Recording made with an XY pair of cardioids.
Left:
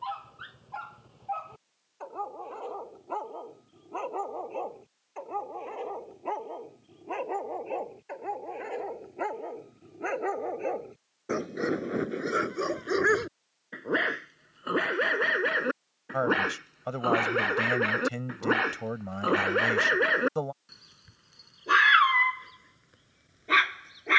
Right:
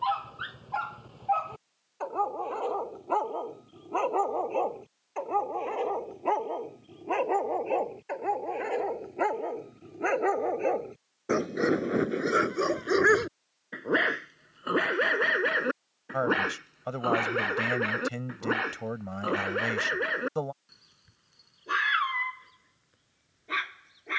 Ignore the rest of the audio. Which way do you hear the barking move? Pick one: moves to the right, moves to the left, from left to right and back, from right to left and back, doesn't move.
moves to the left.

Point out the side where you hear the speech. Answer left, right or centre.
centre.